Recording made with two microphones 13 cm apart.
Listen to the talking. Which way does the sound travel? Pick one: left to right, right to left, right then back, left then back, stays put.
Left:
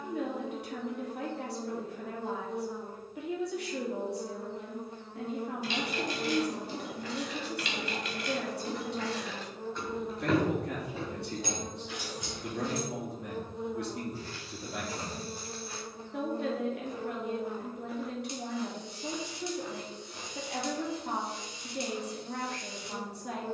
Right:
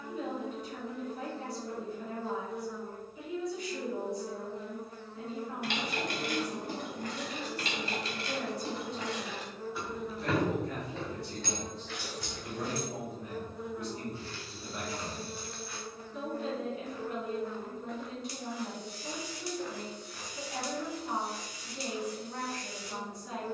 stays put.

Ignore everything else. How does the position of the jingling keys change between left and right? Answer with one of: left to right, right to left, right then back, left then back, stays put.
right to left.